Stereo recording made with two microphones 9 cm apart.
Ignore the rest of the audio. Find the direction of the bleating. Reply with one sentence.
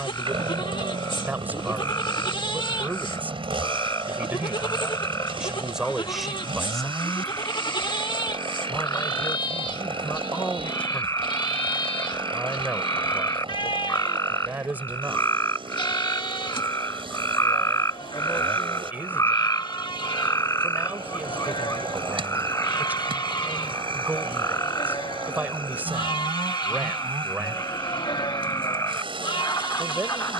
You can hear the bleating on the left.